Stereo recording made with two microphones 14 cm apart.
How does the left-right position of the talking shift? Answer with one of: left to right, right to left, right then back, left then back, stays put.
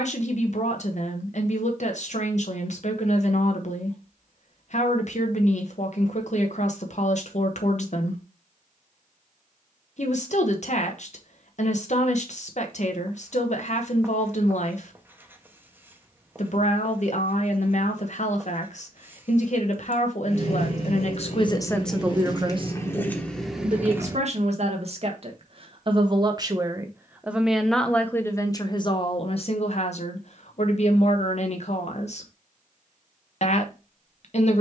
right then back.